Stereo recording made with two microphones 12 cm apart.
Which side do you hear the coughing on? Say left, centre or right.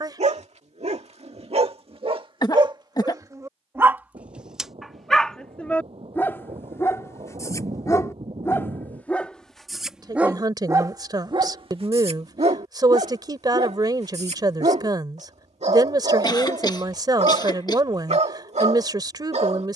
left.